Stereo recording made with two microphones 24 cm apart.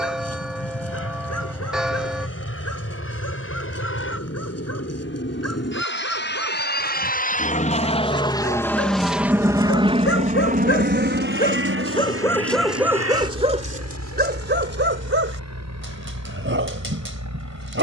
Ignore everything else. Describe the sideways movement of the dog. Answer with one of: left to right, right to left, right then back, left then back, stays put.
left to right.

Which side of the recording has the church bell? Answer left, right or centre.
centre.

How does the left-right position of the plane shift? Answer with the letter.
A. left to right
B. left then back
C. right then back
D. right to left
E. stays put
A.